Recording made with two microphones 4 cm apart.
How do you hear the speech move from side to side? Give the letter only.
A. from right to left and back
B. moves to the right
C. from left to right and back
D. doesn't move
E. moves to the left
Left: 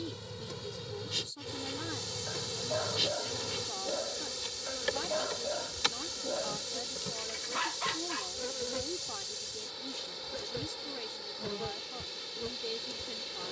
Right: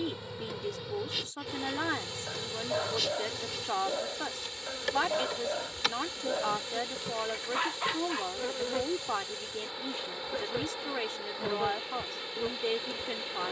D.